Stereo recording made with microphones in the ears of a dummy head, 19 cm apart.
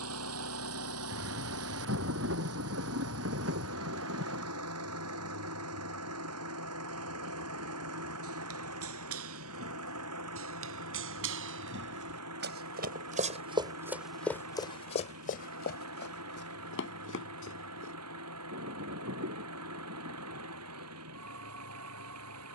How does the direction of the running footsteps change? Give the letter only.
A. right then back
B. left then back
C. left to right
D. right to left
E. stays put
D.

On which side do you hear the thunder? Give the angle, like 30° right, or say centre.
70° right.